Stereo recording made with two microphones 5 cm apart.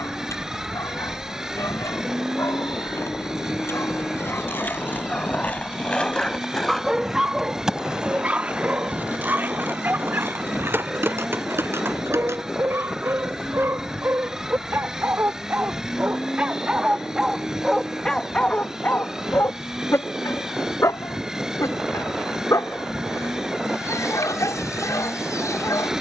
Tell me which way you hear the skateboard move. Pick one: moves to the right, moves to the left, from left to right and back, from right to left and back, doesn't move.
moves to the right.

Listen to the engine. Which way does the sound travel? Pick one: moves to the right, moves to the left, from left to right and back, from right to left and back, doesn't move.
doesn't move.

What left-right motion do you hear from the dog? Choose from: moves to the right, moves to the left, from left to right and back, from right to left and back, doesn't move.
from left to right and back.